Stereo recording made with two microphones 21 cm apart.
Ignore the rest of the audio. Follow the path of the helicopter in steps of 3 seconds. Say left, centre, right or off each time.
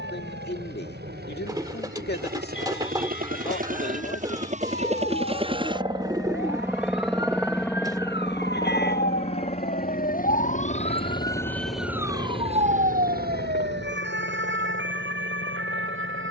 right, right, centre, left, left, left.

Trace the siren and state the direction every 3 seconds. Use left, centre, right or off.
left, left, left, left, right, right.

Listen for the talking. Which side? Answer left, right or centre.
left.